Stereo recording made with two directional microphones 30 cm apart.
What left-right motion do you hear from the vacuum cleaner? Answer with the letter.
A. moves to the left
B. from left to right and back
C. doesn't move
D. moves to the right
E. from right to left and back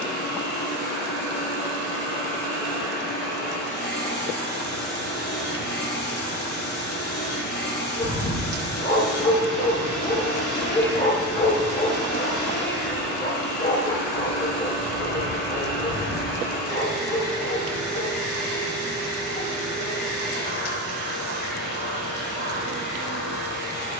C.